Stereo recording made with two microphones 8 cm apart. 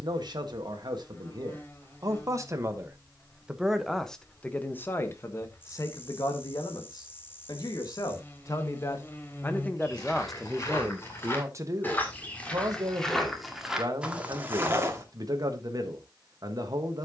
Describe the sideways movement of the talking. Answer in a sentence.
You can hear the talking move from right to left and back again.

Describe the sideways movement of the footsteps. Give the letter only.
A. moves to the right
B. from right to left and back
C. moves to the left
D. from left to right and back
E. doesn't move
A.